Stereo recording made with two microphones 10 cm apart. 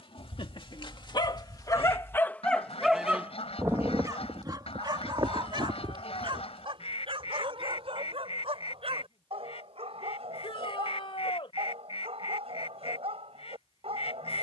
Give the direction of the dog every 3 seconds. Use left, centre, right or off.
left, right, right, right, right.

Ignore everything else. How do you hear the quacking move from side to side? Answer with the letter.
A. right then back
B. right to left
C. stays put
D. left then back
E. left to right
C.